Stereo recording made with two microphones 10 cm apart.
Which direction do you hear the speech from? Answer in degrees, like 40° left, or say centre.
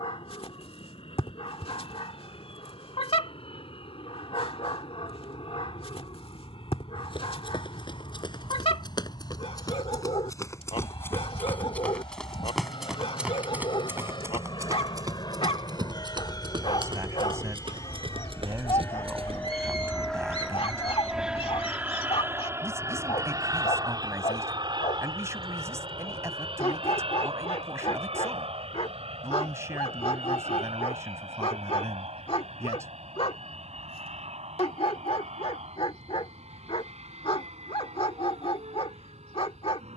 30° right.